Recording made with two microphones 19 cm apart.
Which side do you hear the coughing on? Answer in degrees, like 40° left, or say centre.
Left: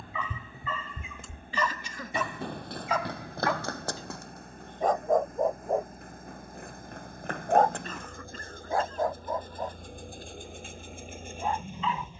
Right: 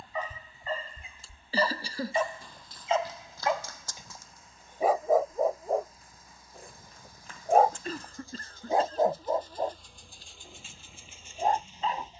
30° right.